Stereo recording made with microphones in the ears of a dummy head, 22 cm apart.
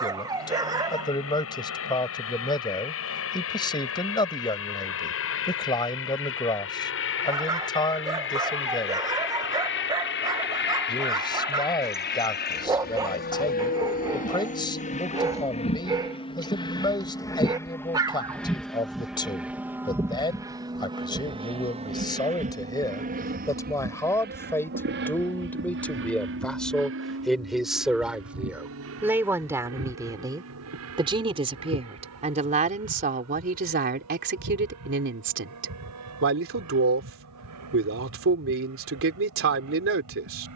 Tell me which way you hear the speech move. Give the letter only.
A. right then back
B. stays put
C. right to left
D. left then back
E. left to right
E.